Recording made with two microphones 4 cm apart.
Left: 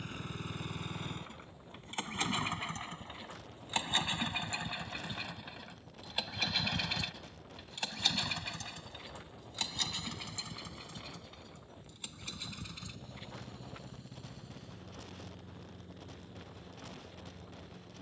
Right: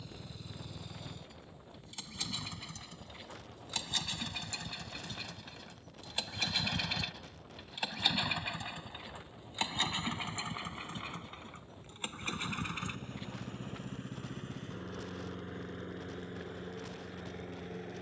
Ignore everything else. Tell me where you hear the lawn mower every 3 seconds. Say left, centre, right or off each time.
left, left, centre, right, right, right.